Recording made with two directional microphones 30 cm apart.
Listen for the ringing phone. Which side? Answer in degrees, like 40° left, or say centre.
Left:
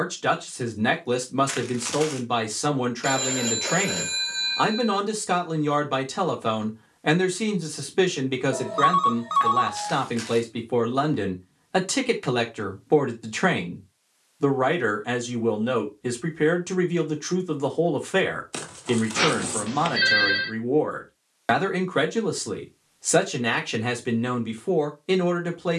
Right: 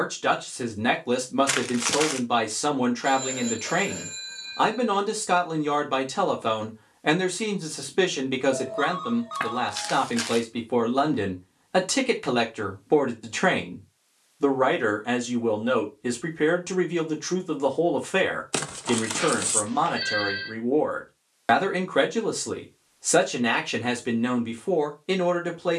60° left.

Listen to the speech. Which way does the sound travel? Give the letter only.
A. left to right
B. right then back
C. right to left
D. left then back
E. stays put
E.